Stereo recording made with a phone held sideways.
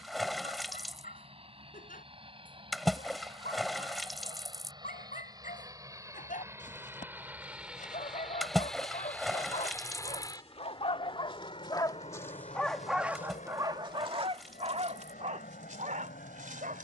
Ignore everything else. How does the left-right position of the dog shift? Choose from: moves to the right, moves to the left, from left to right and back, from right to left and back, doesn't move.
moves to the right.